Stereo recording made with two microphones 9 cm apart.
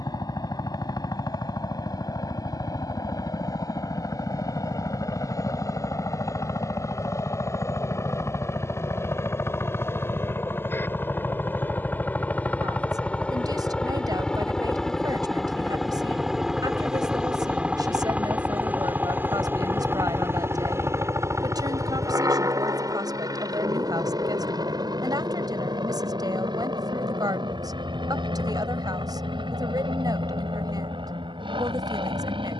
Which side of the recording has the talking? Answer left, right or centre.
right.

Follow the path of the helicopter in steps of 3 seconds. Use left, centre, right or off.
left, left, left, left, centre, centre, right, right, right, right, right.